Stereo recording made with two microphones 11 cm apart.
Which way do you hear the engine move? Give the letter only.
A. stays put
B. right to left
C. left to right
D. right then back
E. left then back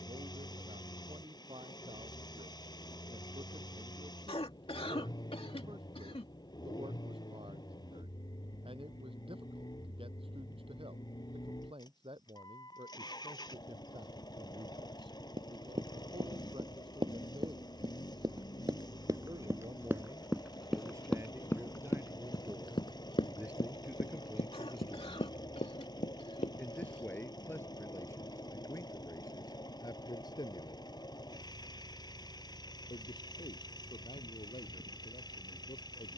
A.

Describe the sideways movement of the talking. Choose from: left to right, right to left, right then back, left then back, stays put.
right to left.